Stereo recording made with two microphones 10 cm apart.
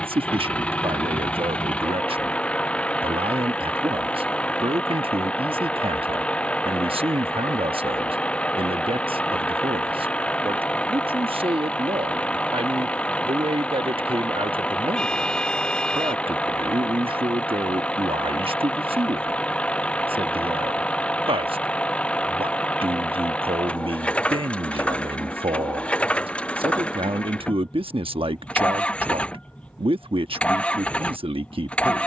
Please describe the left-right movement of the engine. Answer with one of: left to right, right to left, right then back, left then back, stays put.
stays put.